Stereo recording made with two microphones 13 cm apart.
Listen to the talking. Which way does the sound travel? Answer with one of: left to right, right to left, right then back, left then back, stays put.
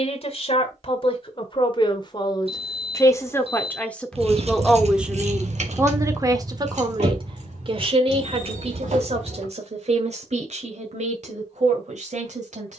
left to right.